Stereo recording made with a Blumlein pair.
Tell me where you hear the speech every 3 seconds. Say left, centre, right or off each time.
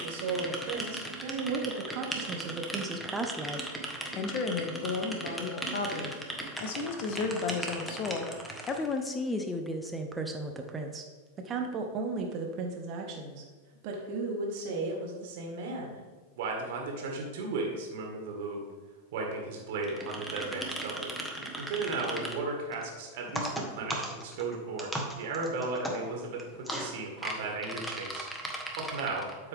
right, left, left, centre, right, right, right, right, right, right.